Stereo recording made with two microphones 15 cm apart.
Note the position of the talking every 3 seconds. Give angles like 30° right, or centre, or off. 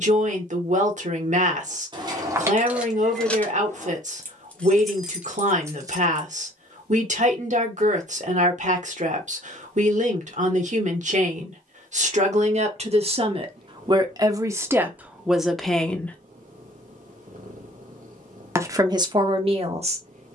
60° right, 60° right, 60° right, 60° right, 40° right, centre, 40° right.